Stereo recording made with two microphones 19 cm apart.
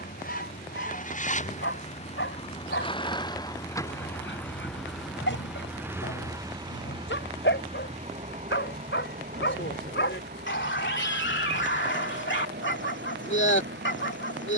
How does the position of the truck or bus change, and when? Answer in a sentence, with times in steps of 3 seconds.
In this clip you hear the truck or bus on the left from 0 s, in the centre from 3 s and on the right from 6 s.